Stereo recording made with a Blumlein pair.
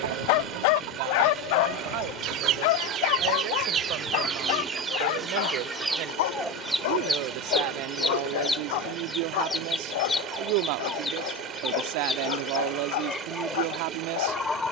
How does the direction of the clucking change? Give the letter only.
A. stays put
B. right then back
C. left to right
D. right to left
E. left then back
D.